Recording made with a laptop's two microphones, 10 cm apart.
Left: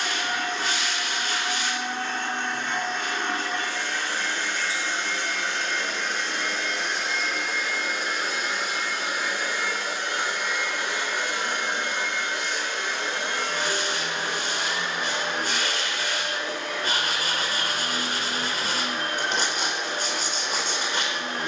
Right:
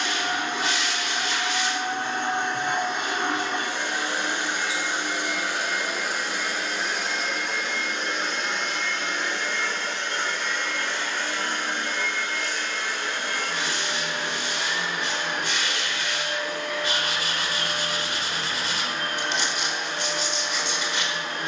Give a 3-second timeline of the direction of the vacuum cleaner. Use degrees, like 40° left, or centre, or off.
20° right, 10° right, centre, 10° left, 20° left, 30° left, 30° left.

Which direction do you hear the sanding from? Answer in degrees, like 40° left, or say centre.
40° left.